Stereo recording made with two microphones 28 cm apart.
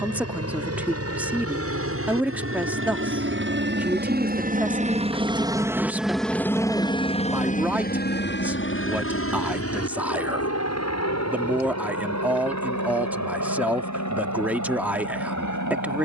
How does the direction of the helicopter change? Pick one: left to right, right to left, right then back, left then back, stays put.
right to left.